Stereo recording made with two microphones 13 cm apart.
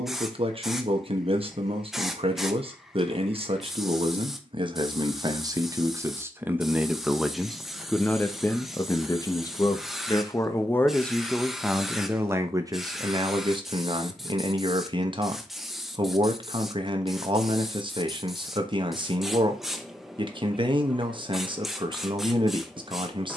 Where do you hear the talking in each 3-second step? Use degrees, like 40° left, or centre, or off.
40° right, 40° right, centre, 20° left, 30° right, 40° right, 40° right, 40° right.